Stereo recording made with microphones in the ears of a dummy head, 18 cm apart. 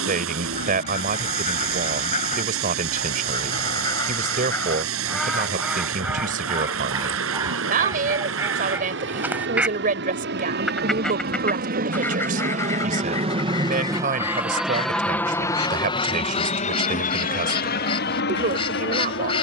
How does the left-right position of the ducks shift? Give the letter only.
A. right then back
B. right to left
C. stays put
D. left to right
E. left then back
A.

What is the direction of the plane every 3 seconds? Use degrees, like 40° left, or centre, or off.
80° right, 80° right, 70° right, 60° right, 20° right, 30° left, 50° left.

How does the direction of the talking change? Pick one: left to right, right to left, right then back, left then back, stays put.
stays put.